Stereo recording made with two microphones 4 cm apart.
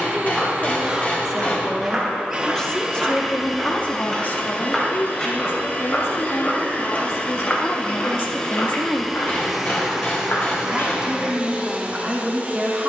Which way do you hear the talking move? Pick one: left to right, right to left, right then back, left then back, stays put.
left then back.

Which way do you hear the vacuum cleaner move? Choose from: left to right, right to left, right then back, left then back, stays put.
left then back.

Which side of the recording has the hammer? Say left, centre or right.
left.